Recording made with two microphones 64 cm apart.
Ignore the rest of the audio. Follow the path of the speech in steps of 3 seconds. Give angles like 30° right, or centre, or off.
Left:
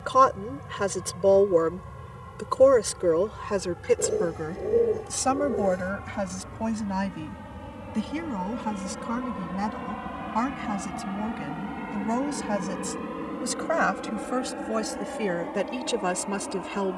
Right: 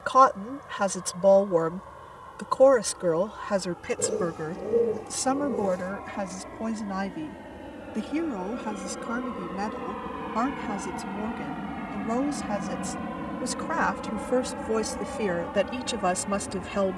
20° right, centre, 30° left, 30° left, 10° left, centre.